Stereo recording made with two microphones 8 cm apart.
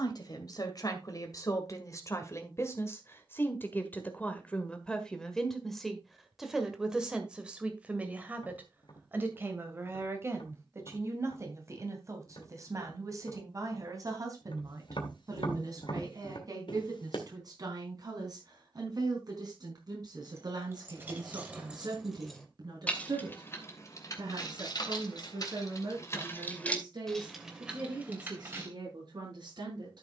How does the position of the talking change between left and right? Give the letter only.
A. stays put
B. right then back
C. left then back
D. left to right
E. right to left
D.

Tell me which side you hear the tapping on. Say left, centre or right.
left.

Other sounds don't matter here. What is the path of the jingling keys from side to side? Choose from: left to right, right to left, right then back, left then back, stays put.
left then back.